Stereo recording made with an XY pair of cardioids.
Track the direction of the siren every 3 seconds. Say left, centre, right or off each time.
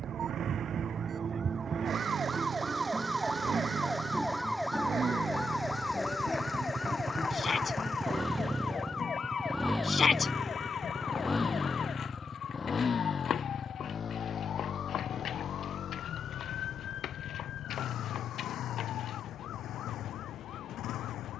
right, centre, left, left, left, left, left.